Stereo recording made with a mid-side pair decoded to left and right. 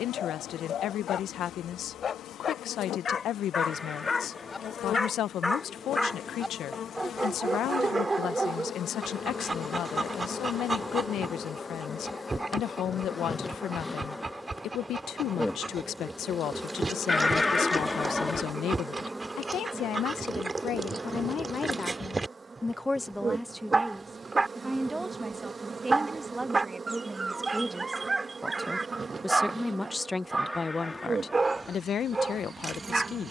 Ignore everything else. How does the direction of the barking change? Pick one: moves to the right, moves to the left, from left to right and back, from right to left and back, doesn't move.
moves to the right.